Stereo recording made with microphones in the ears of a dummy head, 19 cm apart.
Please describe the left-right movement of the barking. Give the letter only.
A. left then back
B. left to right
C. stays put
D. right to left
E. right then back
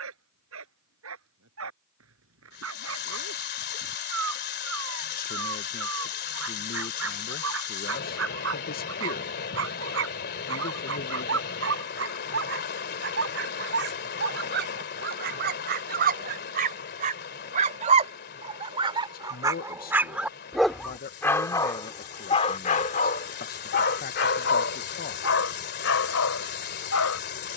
D.